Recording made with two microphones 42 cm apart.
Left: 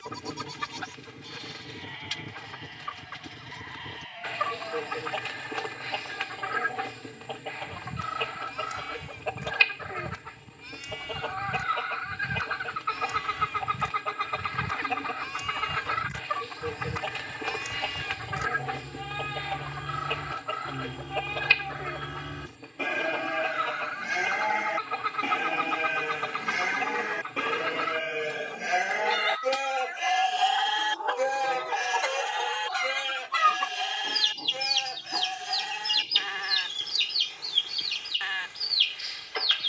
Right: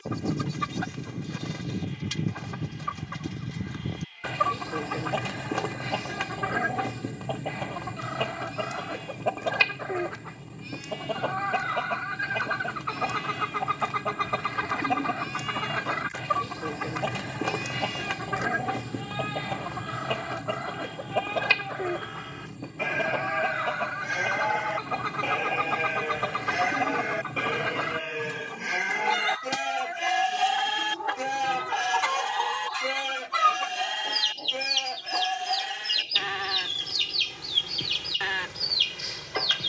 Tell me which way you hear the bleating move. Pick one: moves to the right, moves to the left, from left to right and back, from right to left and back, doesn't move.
moves to the right.